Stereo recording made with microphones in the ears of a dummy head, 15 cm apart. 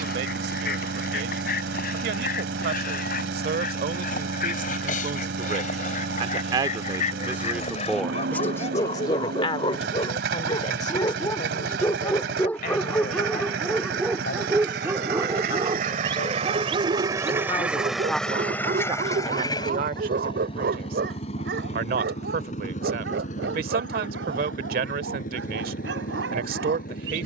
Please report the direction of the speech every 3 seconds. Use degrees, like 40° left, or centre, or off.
70° right, 50° right, 10° right, 40° left, 60° left, 40° left, 40° right, 60° right, 60° right.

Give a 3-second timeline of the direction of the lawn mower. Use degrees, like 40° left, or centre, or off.
70° right, 70° right, 70° right, 70° right, 70° right, 30° right, 20° left, 40° left, 50° left.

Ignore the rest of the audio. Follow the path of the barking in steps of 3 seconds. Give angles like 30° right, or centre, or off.
60° left, 50° left, 40° left, 30° left, centre, 30° right, 60° right, 70° right, 80° right.